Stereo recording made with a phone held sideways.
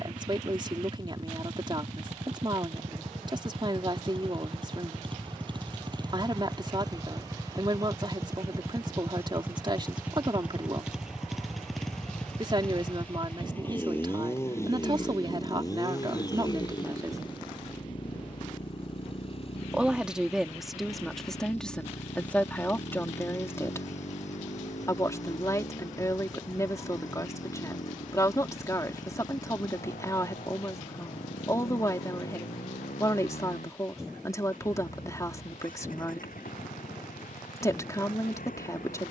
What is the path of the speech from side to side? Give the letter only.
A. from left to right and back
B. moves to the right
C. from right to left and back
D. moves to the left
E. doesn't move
D.